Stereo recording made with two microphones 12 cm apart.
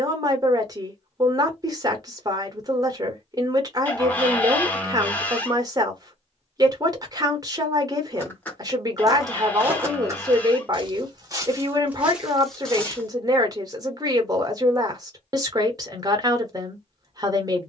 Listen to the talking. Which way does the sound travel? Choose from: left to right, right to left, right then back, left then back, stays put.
stays put.